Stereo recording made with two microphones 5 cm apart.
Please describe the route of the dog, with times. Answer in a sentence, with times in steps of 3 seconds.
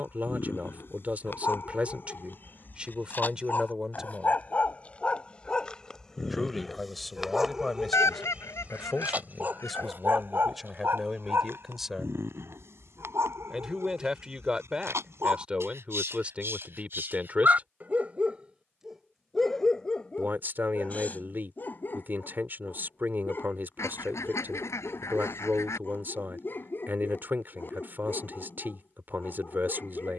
You can hear the dog on the left from 0 s, in the centre from 6 s, on the right from 9 s, in the centre from 18 s and on the left from 21 s.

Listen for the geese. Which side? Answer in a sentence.
You can hear the geese on the left.